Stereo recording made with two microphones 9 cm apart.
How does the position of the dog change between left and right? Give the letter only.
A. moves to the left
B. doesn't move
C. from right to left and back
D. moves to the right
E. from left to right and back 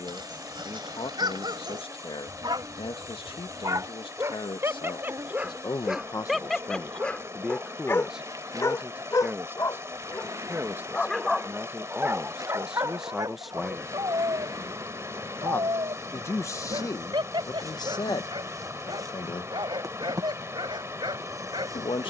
C.